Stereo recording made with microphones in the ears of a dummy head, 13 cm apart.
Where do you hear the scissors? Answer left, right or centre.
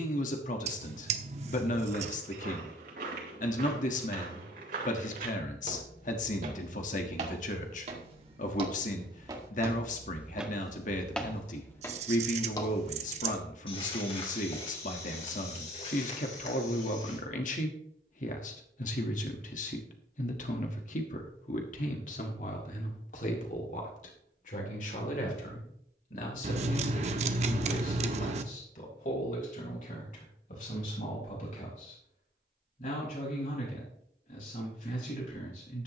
right.